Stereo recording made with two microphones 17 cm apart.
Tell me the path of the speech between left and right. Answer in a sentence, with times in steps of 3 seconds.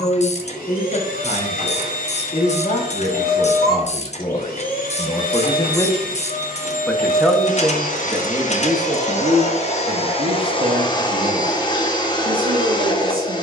In this clip you hear the speech on the left from 0 s, in the centre from 6 s and on the right from 9 s.